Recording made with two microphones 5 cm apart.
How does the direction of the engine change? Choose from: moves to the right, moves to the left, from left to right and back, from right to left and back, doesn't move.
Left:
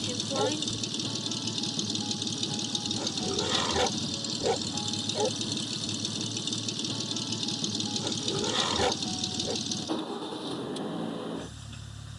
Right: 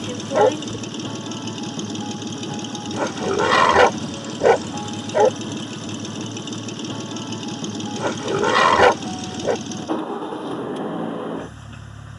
doesn't move.